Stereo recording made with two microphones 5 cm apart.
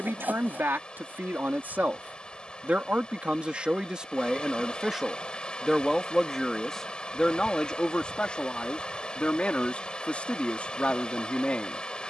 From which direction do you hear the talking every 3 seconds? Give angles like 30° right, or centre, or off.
40° right, 20° right, 10° left, 30° left.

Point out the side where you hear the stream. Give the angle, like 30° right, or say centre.
20° left.